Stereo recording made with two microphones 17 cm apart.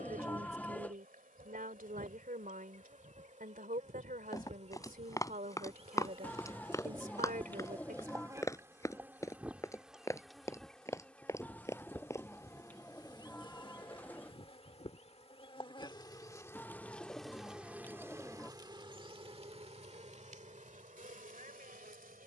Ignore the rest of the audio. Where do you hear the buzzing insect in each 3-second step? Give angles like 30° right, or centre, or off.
50° right, 40° right, 20° right, centre, 30° left, 10° left, 40° right, 50° right.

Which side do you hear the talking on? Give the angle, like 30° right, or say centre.
60° right.